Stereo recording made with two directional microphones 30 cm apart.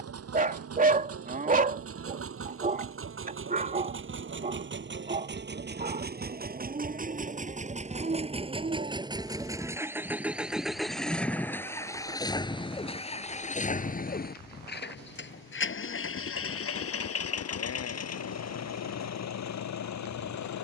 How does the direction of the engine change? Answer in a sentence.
You can hear the engine go from the right side to the left.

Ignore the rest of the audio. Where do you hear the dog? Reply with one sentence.
You can hear the dog on the right.